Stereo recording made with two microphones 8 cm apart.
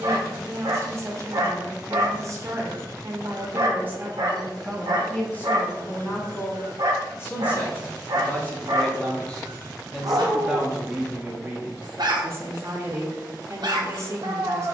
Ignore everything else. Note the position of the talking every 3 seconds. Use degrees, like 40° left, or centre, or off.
40° right, centre, 30° left, 10° right, 40° right.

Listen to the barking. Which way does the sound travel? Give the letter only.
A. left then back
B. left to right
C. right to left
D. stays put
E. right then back
D.